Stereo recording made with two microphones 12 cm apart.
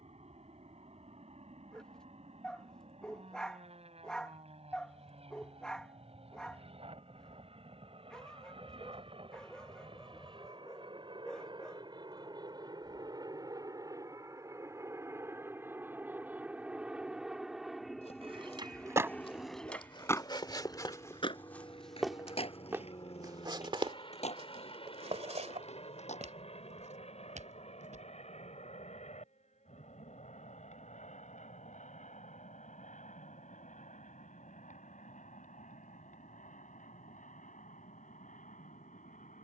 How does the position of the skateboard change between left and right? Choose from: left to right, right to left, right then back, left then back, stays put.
right to left.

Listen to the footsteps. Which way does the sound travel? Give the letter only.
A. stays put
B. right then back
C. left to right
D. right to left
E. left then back
C.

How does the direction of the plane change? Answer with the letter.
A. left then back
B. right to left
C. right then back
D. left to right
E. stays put
B.